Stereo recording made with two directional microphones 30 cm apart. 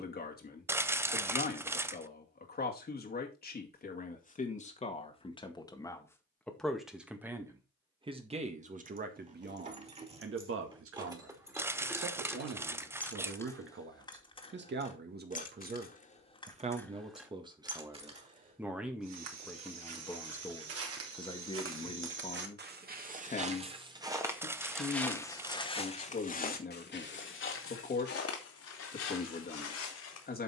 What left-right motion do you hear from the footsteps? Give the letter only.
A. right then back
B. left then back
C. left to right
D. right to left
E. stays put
D.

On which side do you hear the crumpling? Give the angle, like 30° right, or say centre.
10° right.